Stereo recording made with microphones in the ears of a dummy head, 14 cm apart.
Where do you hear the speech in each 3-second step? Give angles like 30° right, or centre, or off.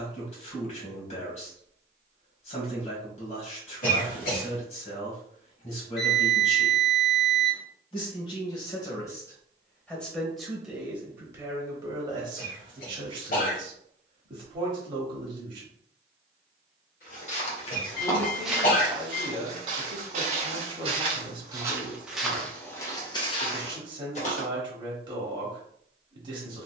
50° left, 50° left, 40° left, centre, 30° right, 30° right, 30° right, 30° right, 30° right.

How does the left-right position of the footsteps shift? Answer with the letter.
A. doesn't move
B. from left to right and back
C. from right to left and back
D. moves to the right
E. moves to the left
B.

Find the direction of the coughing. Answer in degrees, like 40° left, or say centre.
60° left.